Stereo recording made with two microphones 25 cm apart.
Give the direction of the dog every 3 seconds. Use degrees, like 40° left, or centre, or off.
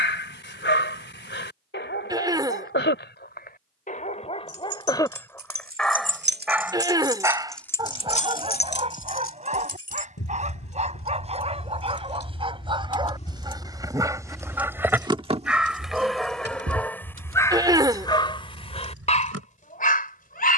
50° left, 20° left, 20° right, 30° right, 20° right, 10° left, 30° left.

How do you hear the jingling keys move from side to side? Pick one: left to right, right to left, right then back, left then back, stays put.
left then back.